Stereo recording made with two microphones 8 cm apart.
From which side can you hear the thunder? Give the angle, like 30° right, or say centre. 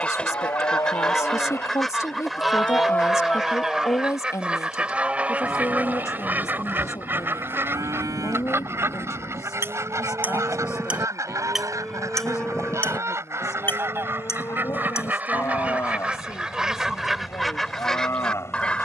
40° left.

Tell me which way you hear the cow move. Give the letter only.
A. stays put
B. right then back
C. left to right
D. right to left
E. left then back
B.